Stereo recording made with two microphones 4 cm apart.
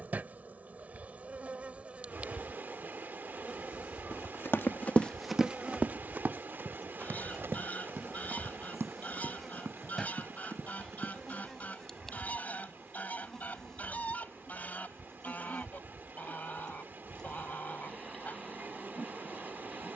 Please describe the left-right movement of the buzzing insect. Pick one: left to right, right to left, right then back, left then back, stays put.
right to left.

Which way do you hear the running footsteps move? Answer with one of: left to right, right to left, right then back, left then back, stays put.
left to right.